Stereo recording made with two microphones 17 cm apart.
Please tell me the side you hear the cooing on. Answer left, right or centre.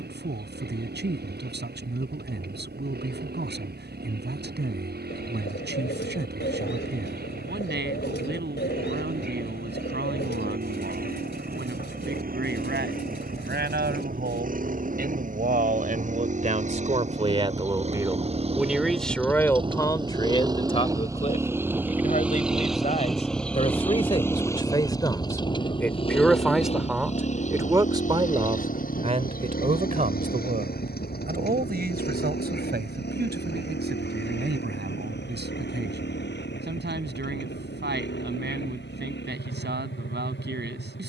left.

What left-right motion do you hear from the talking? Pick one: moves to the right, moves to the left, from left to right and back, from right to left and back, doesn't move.
from right to left and back.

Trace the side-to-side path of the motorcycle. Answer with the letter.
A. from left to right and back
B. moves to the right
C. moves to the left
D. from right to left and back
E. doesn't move
C.